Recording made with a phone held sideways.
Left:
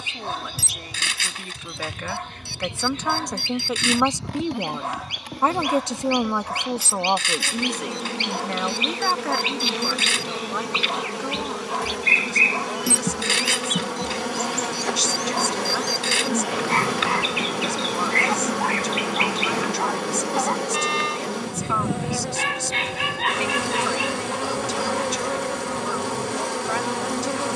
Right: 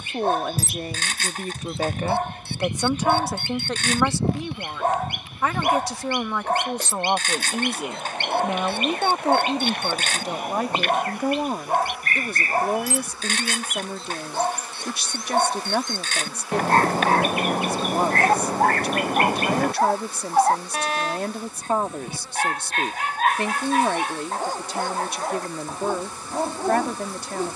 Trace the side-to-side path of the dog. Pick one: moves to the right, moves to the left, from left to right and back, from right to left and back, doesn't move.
doesn't move.